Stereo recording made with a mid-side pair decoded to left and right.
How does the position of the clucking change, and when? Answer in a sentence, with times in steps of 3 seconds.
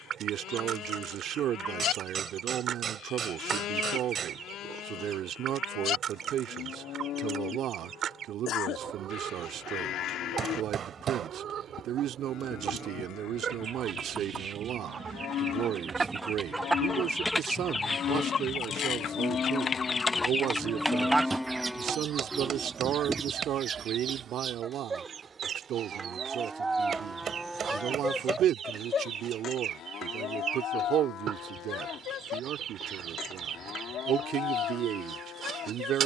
In this clip you hear the clucking on the right from 0 s, in the centre from 15 s, on the left from 18 s and on the right from 21 s.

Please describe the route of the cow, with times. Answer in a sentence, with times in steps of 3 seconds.
In this clip you hear the cow on the left from 0 s, in the centre from 21 s, on the right from 24 s and on the left from 27 s.